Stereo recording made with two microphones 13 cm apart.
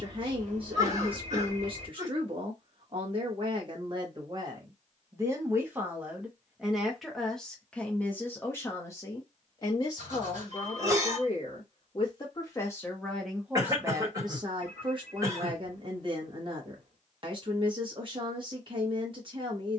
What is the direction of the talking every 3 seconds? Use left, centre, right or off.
right, right, centre, left, centre, right, right.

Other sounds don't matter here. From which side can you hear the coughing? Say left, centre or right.
right.